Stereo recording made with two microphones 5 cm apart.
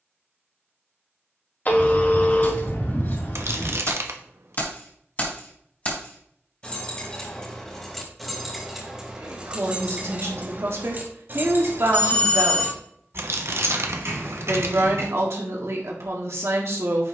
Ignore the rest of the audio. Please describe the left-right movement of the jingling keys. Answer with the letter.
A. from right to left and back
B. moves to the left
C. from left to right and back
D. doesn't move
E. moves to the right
E.